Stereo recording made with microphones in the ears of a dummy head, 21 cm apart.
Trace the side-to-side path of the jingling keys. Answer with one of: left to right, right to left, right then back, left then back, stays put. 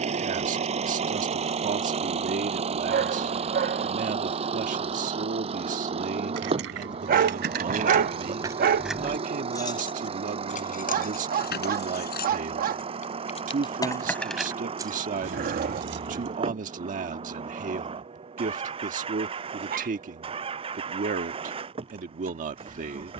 left then back.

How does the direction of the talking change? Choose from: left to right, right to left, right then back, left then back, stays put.
stays put.